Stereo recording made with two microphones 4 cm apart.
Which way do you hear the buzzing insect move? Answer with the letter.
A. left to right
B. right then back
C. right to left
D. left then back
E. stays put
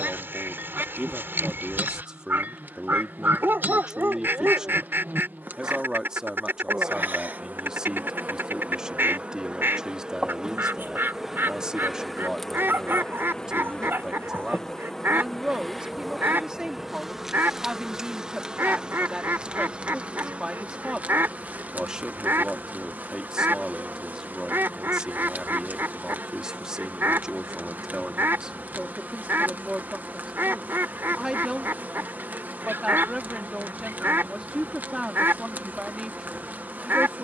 D.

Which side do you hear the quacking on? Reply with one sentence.
You can hear the quacking on the right.